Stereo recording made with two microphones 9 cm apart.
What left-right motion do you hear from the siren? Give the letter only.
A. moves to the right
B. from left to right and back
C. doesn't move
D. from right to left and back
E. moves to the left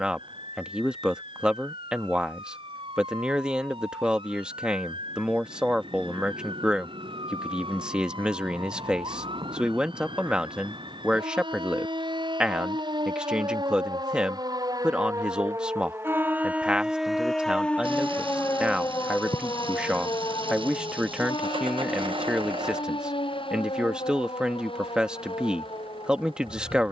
E.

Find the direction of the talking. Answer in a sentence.
You can hear the talking in the centre.